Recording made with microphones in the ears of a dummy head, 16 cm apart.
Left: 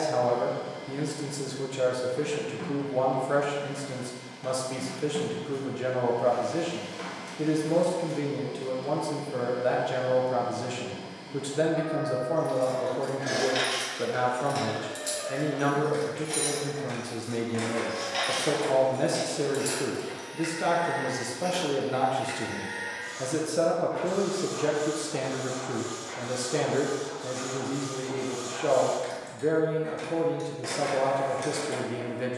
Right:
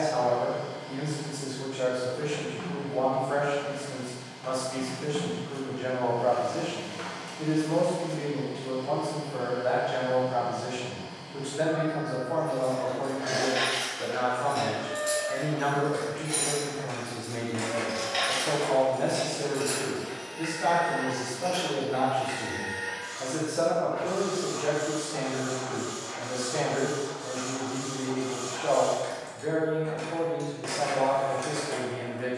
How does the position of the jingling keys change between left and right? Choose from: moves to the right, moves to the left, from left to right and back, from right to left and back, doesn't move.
from left to right and back.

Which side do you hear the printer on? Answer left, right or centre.
centre.